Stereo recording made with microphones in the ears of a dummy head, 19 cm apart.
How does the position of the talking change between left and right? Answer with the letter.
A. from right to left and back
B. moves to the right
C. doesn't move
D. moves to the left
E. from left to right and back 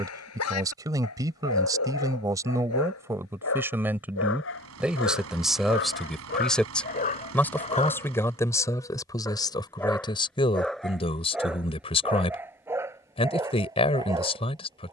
D.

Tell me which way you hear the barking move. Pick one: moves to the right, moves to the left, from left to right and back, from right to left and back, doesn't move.
moves to the right.